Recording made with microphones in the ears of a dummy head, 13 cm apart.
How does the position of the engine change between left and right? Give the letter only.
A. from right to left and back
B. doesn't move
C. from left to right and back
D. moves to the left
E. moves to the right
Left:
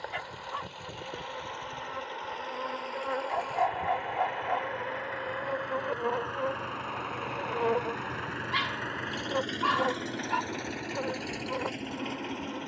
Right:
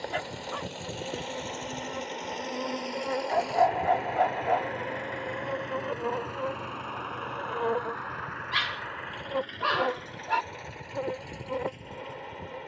D.